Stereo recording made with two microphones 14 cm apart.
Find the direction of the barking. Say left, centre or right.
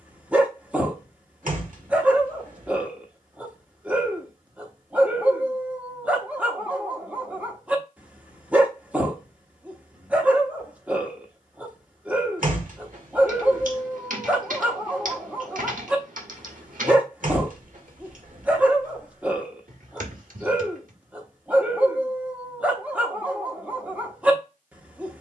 centre.